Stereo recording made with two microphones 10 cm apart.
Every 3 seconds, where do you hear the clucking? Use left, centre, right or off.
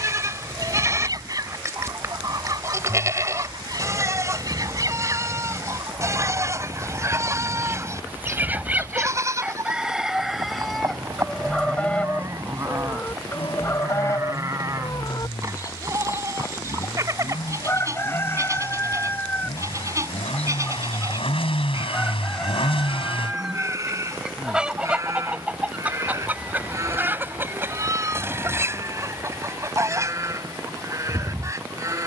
right, right, right, centre, left, left, left, centre, centre, right, right.